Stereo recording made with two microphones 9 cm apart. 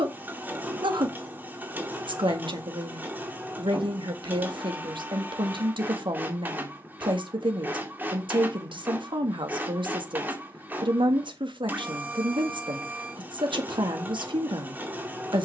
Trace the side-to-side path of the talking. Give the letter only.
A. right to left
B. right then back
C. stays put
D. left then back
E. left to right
C.